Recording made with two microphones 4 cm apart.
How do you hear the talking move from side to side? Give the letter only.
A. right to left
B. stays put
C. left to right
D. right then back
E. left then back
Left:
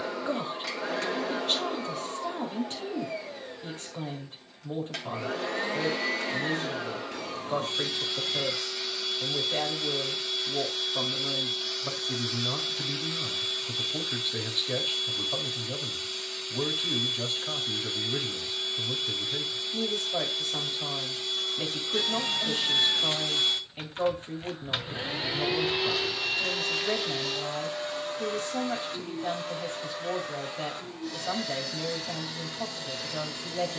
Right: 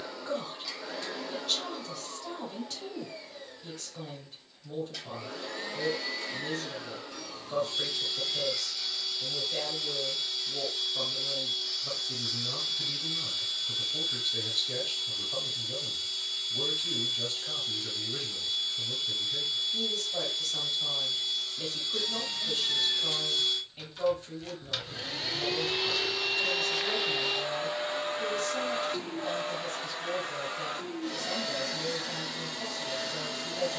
B.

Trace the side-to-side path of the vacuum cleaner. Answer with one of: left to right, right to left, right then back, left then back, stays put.
left to right.